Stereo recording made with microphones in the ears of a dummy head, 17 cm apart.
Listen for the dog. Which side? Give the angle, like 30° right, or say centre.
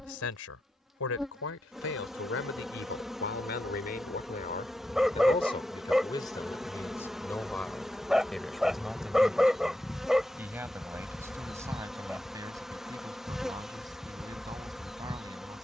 centre.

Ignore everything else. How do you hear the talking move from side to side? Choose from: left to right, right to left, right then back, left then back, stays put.
left to right.